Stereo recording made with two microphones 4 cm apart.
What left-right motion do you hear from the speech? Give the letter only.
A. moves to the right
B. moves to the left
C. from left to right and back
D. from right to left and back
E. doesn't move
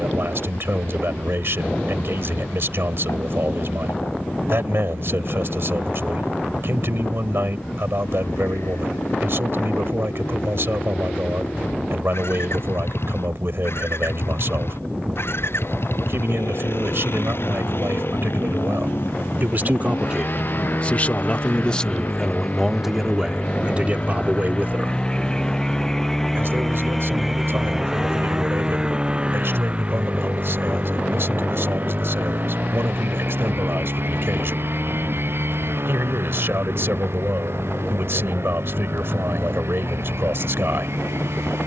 D.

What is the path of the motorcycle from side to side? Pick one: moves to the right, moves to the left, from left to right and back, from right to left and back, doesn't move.
moves to the right.